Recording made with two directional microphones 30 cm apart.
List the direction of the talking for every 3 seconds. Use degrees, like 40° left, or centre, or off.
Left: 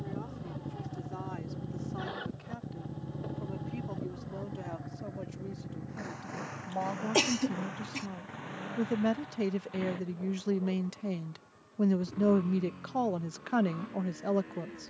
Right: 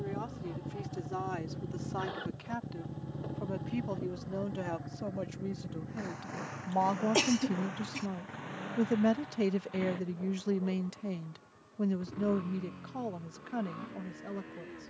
50° right, 40° right, 30° right, centre, 40° left.